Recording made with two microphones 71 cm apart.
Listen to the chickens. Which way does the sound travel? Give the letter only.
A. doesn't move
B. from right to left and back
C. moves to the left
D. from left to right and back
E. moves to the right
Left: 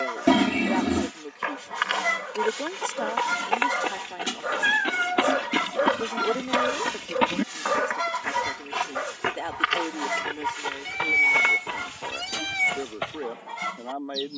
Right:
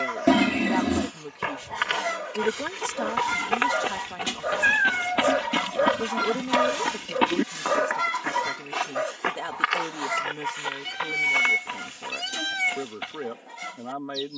D.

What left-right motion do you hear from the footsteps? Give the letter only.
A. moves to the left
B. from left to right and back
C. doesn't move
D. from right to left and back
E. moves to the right
A.